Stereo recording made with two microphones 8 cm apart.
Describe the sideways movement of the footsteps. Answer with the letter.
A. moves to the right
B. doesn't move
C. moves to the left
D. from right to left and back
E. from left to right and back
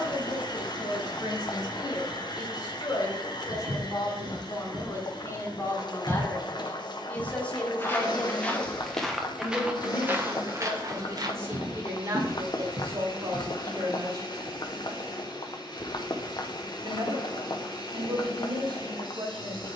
D.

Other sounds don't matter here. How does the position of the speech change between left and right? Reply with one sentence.
You can hear the speech move from left to right.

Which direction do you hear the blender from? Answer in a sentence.
You can hear the blender on the left.